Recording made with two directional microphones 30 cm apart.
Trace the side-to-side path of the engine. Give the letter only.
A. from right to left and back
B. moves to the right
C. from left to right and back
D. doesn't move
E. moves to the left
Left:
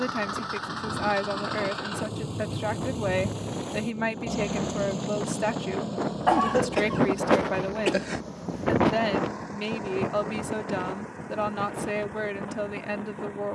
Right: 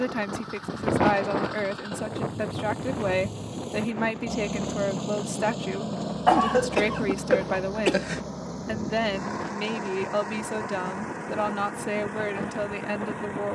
B.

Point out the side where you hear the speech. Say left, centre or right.
centre.